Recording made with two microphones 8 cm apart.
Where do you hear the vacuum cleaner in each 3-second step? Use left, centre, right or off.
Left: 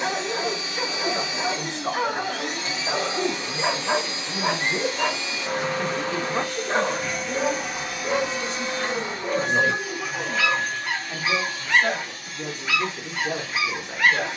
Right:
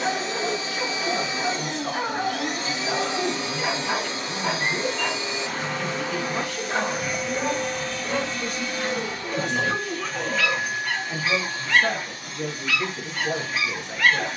right, right, centre, centre, right.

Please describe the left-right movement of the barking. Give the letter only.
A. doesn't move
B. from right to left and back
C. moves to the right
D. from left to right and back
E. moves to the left
A.